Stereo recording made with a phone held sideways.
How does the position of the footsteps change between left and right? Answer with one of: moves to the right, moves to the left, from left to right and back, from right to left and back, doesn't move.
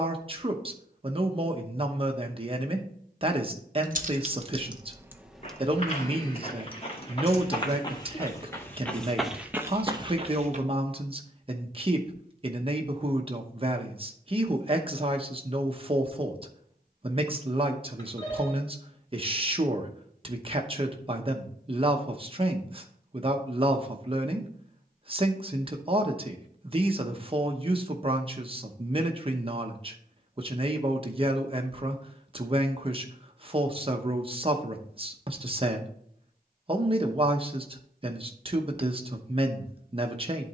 moves to the right.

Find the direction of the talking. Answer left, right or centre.
right.